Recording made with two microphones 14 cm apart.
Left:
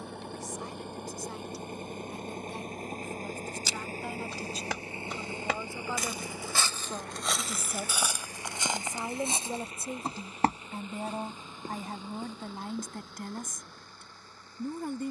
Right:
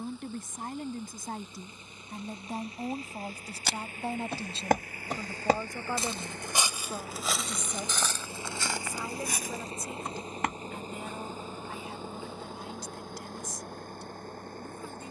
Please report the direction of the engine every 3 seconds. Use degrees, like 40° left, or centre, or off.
60° left, 30° left, 10° right, 40° right, 50° right.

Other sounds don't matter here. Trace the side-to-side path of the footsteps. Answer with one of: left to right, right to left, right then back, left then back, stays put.
right to left.